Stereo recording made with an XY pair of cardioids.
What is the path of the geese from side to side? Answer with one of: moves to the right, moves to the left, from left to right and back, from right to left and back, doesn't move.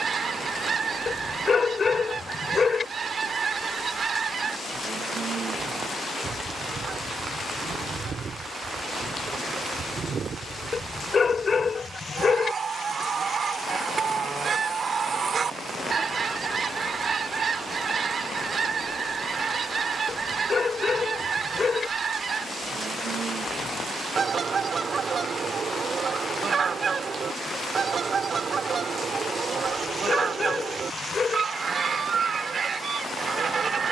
doesn't move.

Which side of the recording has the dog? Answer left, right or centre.
left.